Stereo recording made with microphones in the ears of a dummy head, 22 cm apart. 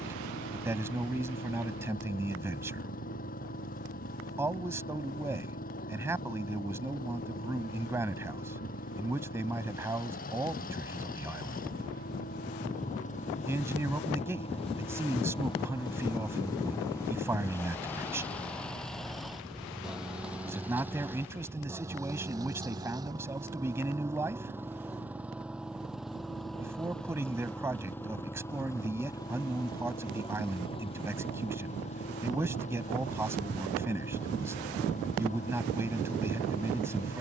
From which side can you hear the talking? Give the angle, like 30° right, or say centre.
10° right.